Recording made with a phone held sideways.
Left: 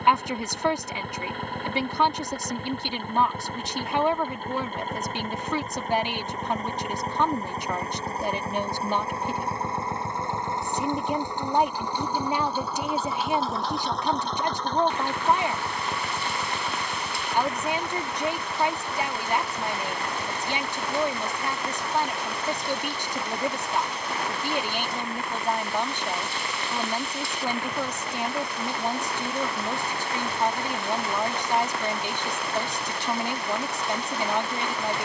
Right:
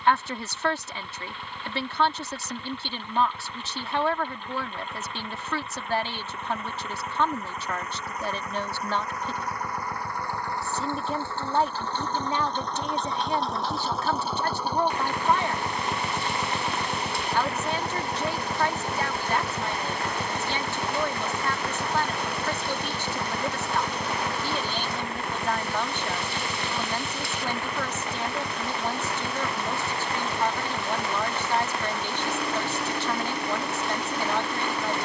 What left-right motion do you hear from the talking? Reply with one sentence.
In this clip you hear the talking stay in one place.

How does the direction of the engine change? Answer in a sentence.
In this clip you hear the engine move from left to right.